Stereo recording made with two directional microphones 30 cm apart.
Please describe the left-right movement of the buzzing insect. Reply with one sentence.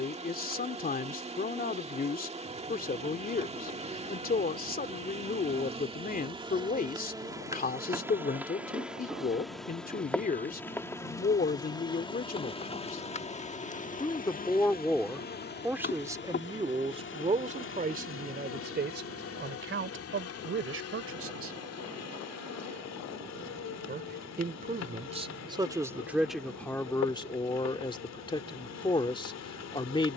In this clip you hear the buzzing insect travel towards the left.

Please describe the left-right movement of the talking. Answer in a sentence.
In this clip you hear the talking move from left to right and back again.